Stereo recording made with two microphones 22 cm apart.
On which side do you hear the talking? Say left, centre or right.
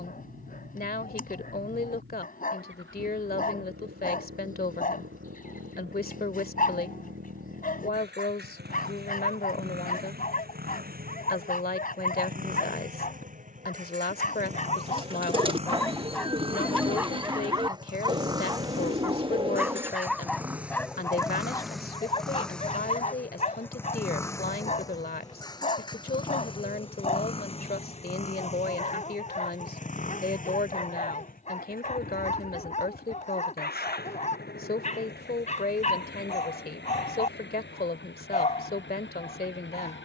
left.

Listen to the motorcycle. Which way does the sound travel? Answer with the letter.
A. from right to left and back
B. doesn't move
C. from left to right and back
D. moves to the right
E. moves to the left
E.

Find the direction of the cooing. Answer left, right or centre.
right.